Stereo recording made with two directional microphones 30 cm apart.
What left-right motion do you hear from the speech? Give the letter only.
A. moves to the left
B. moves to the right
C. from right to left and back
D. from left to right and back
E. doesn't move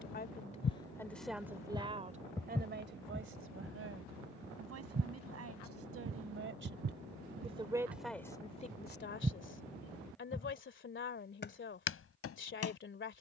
D.